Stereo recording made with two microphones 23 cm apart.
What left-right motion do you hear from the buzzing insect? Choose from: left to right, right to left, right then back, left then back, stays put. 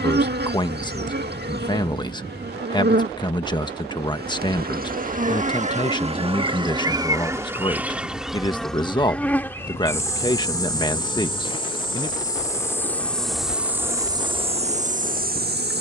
left then back.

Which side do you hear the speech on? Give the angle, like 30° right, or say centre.
20° left.